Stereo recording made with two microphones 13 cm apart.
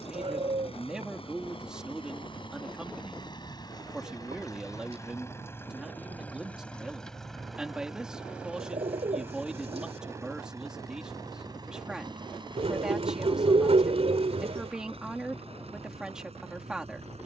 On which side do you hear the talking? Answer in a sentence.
In this clip you hear the talking in the centre.